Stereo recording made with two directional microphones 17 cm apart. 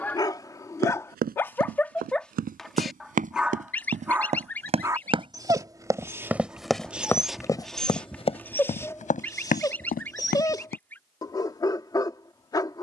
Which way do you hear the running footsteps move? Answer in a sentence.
You can hear the running footsteps go from the right side to the left.